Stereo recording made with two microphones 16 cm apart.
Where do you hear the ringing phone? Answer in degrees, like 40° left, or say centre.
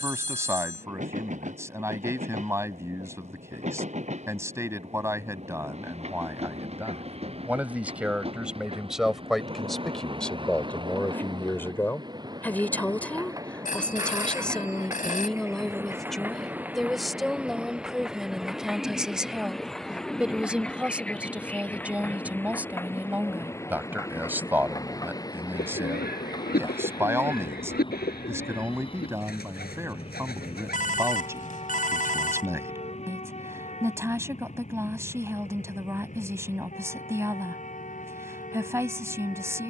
60° left.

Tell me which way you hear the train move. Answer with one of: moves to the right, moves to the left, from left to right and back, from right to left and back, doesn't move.
moves to the left.